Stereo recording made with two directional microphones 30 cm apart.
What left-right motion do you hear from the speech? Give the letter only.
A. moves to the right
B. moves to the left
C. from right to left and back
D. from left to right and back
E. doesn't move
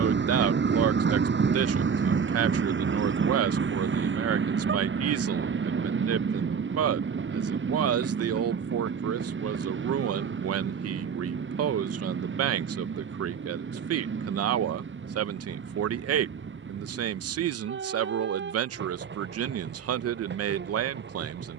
E.